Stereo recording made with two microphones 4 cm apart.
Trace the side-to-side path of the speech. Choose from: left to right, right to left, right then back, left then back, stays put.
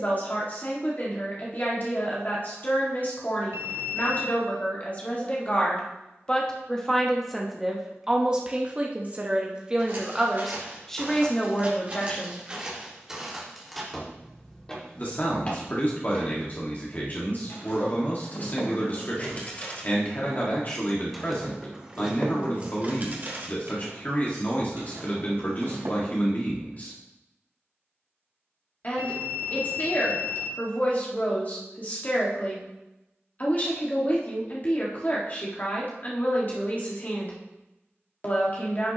right then back.